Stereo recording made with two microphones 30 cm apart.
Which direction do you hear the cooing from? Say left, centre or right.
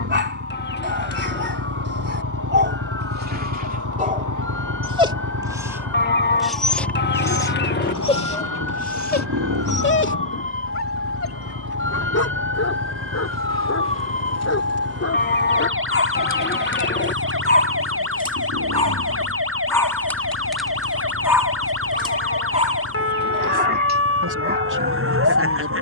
left.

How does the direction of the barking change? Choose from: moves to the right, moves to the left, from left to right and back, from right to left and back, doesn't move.
from right to left and back.